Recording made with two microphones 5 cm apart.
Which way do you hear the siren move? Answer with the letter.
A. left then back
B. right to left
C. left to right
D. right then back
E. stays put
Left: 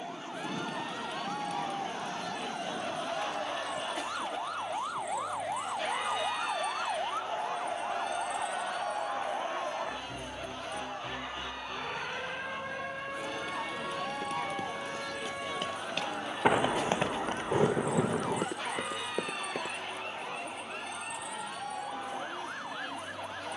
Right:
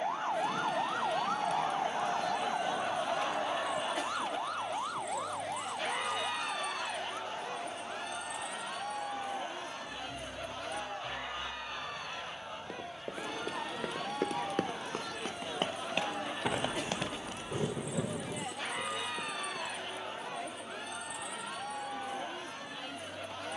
B.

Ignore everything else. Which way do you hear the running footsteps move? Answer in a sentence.
You can hear the running footsteps move to the left.